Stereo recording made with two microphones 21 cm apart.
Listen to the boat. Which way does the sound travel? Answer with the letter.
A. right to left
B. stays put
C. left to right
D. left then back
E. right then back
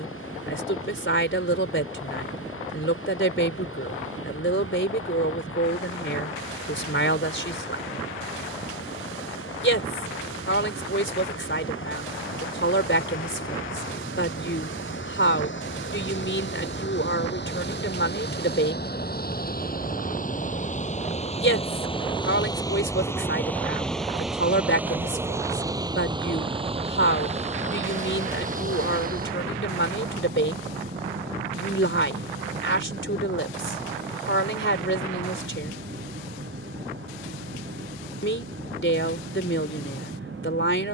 C.